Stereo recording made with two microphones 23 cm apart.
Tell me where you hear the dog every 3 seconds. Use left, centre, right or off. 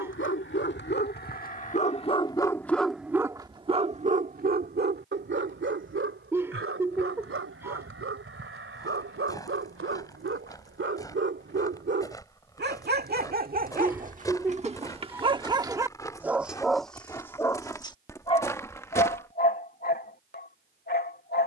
left, right, right, right, right, centre, left.